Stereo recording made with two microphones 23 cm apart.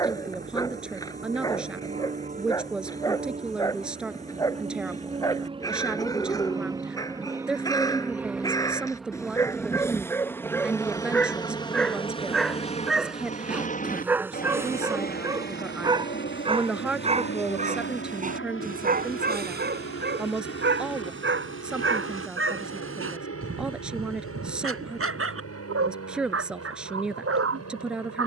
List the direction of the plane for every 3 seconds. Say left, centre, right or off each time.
right, right, centre, centre, left, left, left, left, left, left.